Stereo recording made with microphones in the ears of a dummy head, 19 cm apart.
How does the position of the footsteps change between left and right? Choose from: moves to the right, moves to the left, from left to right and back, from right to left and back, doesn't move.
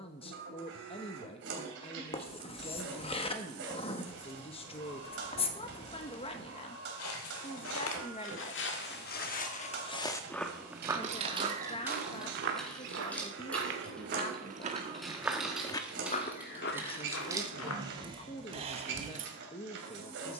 from left to right and back.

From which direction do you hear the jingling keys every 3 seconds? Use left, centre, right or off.
off, off, off, right, centre, centre, right.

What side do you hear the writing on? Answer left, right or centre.
left.